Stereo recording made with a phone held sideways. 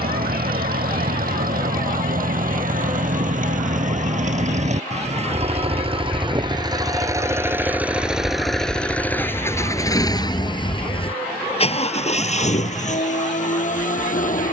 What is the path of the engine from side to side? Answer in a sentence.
In this clip you hear the engine move to the left.